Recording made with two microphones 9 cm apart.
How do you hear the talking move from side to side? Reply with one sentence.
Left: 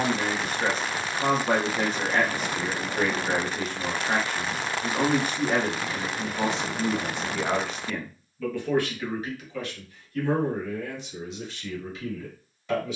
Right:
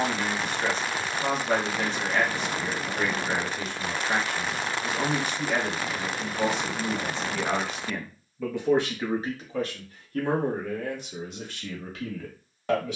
In this clip you hear the talking move from left to right.